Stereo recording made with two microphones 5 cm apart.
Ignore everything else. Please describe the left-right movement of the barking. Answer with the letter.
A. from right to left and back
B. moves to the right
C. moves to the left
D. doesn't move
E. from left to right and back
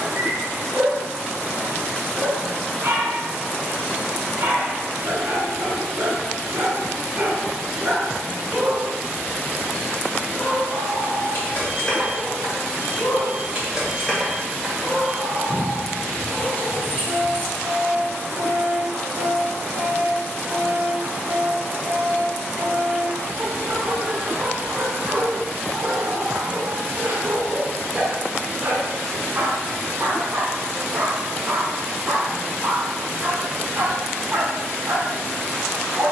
A.